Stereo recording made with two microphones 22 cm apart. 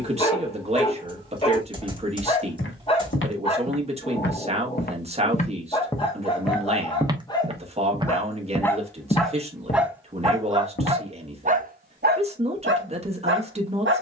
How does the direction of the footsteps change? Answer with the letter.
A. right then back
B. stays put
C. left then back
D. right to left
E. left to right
A.